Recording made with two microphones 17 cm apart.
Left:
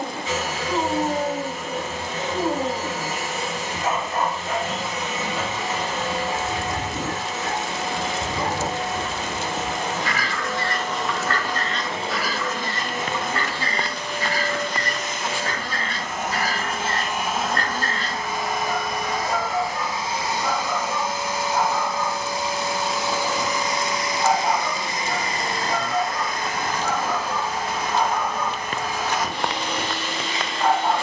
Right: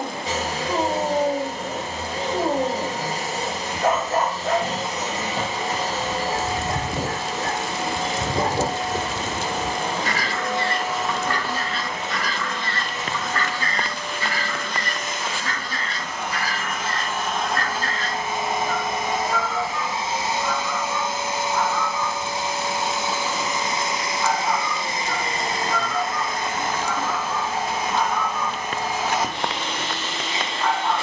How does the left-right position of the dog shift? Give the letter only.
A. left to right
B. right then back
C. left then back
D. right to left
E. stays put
D.